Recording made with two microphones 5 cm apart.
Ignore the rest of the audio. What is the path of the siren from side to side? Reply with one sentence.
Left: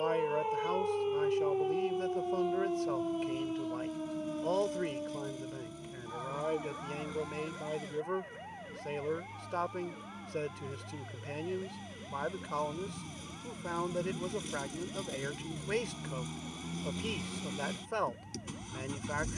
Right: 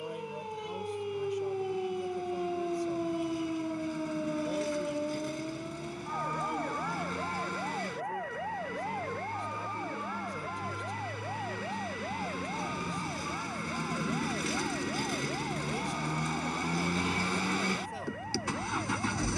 In this clip you hear the siren travel towards the right.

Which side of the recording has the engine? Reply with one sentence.
You can hear the engine on the right.